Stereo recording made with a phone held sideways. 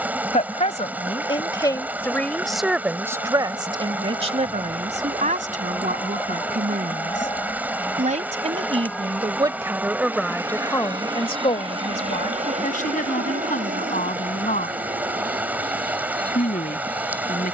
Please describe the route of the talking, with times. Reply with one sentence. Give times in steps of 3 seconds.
You can hear the talking on the left from 0 s, on the right from 3 s, in the centre from 9 s and on the left from 12 s.